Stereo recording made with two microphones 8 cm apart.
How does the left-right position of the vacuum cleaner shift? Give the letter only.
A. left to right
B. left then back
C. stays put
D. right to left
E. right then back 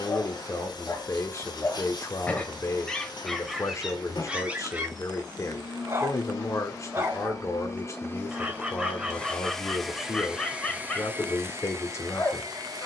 A.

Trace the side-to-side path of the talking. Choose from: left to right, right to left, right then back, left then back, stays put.
stays put.